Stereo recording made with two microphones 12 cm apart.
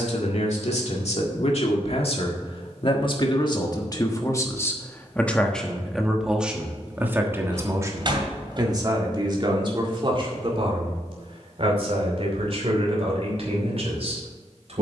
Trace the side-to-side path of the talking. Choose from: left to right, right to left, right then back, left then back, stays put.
left to right.